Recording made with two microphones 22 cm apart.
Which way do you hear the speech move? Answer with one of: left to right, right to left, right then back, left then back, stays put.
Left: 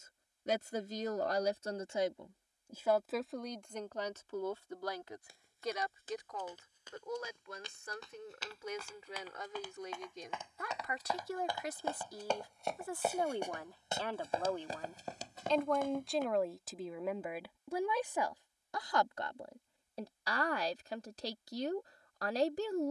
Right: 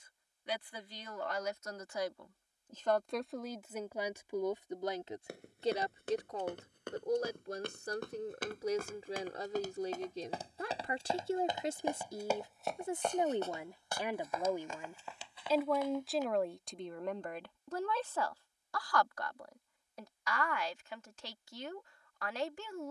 right then back.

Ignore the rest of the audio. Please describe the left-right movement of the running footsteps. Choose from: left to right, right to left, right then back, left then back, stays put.
right to left.